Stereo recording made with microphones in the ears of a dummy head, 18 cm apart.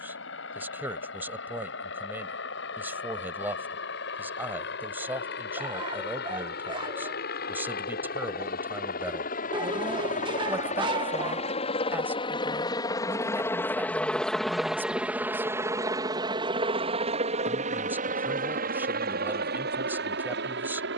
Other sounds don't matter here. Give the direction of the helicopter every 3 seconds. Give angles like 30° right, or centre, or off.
70° left, 60° left, 50° left, 40° left, 10° left, 20° right, 50° right.